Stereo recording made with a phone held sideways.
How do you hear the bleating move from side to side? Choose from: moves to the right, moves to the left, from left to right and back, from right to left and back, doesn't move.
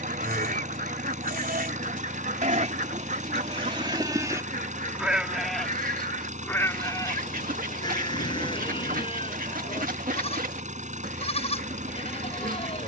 moves to the left.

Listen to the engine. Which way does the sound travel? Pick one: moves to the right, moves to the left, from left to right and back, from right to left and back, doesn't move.
doesn't move.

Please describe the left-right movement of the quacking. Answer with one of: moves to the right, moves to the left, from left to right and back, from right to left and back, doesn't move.
doesn't move.